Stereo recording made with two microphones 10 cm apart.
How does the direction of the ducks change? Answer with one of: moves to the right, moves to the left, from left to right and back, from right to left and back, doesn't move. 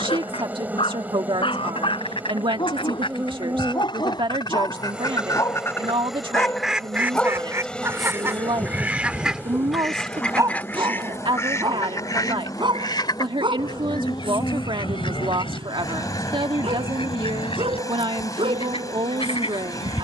from left to right and back.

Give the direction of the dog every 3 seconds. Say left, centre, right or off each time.
left, left, centre, right, right, right, right.